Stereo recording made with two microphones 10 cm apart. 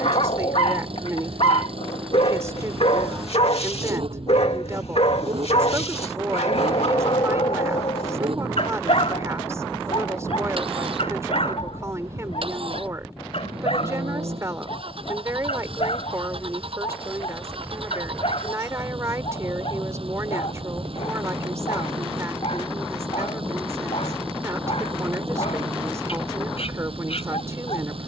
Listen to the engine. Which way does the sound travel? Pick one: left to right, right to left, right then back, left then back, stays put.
stays put.